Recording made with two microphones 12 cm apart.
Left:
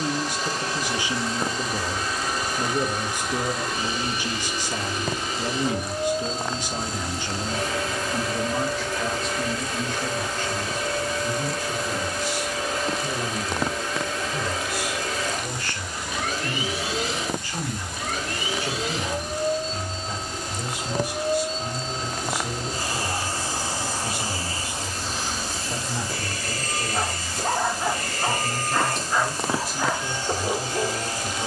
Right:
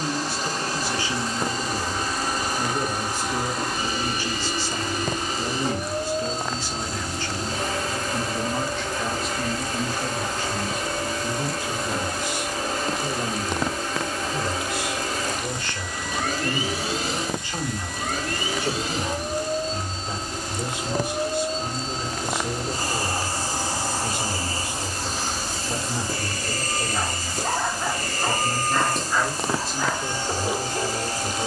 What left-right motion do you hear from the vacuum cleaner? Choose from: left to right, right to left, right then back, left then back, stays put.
stays put.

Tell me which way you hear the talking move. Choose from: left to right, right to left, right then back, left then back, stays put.
left to right.